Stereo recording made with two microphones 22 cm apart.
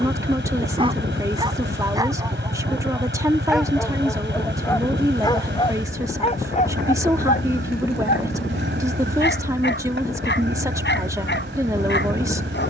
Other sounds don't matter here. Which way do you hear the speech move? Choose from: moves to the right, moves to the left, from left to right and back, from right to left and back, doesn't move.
doesn't move.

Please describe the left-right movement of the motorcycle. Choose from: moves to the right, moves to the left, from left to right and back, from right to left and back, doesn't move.
doesn't move.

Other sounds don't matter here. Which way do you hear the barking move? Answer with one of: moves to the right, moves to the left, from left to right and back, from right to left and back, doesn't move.
moves to the left.